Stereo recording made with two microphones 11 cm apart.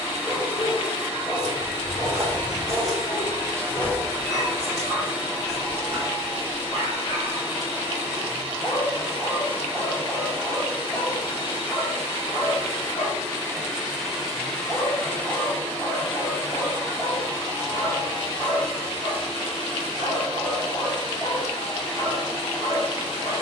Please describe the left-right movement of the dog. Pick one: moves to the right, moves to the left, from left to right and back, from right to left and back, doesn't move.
doesn't move.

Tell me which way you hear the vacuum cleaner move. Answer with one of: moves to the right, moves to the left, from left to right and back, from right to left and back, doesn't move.
moves to the left.